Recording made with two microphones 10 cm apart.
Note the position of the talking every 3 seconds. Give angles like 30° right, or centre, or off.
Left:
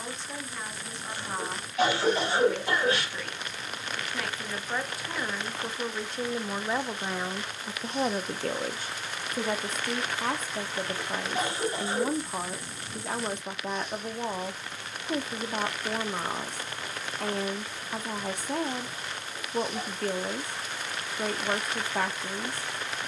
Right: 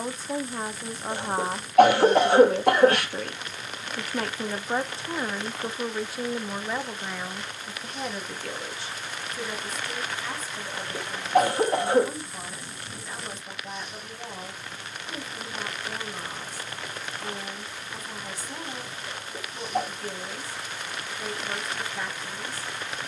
40° right, 30° right, 20° left, 60° left, 60° left, 60° left, 60° left, 60° left.